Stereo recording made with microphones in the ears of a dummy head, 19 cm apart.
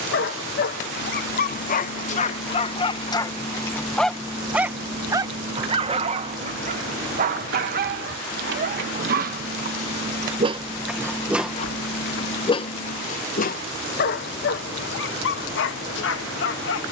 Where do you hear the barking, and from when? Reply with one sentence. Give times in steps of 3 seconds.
You can hear the barking on the left from 0 s, in the centre from 3 s, on the right from 6 s and on the left from 12 s.